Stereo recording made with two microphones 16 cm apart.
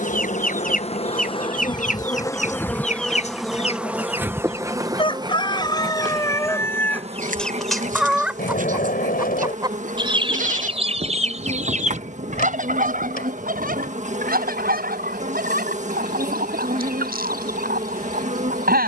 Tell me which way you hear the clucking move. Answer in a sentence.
In this clip you hear the clucking move from left to right.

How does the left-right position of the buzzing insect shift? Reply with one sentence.
You can hear the buzzing insect move from left to right.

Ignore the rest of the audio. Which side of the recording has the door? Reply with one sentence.
In this clip you hear the door on the left.